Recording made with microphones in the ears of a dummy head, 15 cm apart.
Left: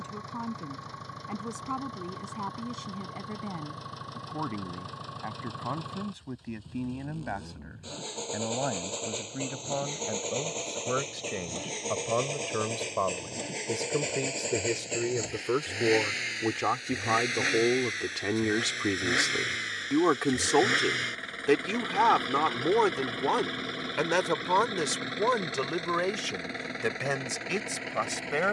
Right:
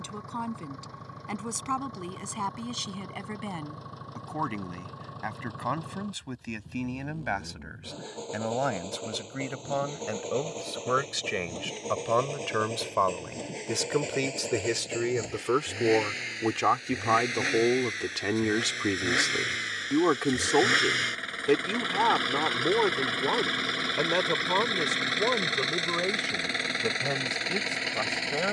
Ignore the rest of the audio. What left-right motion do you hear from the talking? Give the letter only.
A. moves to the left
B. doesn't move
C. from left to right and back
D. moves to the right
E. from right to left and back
A.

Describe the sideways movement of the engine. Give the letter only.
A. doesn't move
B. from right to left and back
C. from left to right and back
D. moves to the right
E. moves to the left
D.